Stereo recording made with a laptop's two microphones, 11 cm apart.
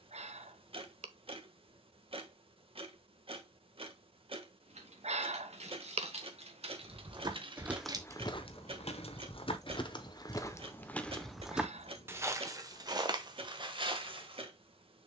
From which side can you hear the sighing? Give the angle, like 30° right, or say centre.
70° right.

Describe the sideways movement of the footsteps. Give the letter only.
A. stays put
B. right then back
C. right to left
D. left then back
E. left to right
D.